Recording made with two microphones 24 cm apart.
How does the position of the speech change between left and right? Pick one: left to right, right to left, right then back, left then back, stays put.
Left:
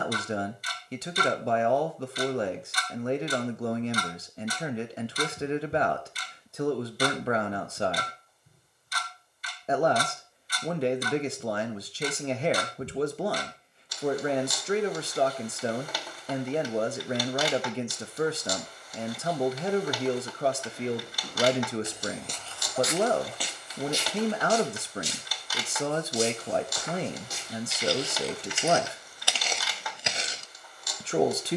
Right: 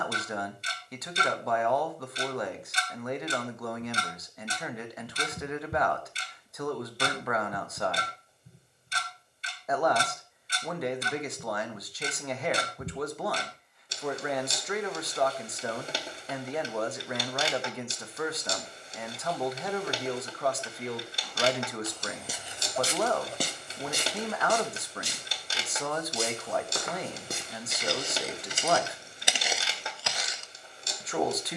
stays put.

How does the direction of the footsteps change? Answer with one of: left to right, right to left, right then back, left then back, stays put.
right then back.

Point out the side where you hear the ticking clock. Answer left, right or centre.
right.